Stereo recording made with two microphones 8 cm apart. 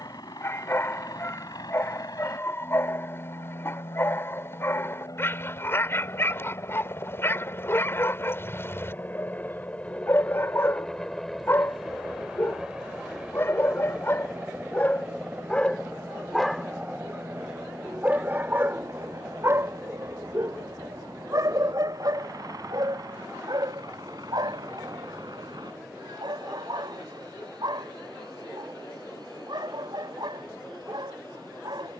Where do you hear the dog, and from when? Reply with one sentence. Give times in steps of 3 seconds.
In this clip you hear the dog on the left from 0 s, in the centre from 15 s and on the right from 18 s.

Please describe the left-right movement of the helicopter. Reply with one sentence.
You can hear the helicopter travel towards the right.